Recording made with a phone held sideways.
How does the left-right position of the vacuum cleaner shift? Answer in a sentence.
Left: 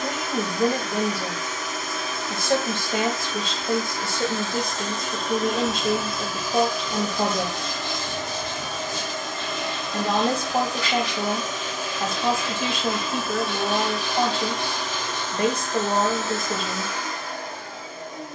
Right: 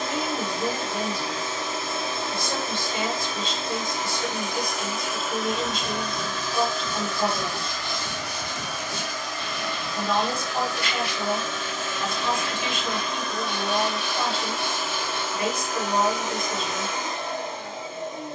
You can hear the vacuum cleaner move from right to left and back again.